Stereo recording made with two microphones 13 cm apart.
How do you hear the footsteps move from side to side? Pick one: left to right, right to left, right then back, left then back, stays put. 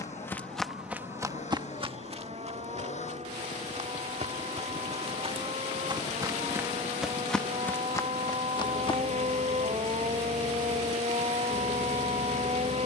right then back.